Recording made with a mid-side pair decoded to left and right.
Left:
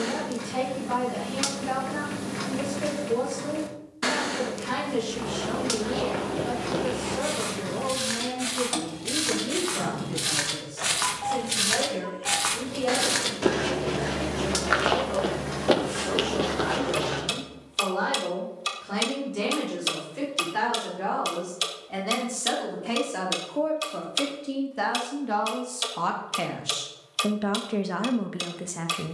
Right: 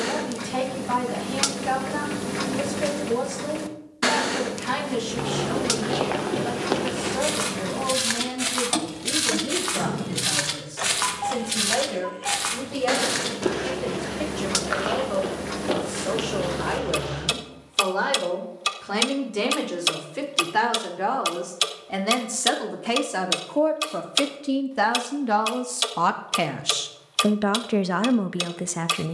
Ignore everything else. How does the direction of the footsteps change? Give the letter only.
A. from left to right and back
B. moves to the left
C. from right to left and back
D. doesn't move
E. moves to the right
B.